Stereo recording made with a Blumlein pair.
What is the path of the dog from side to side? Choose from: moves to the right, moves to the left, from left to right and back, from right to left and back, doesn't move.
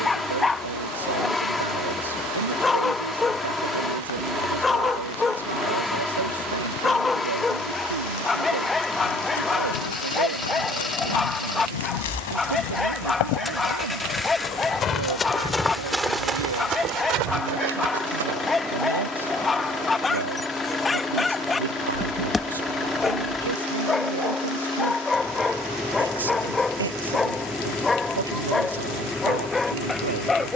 doesn't move.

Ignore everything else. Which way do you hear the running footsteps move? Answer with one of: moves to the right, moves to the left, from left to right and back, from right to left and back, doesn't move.
moves to the right.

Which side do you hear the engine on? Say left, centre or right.
centre.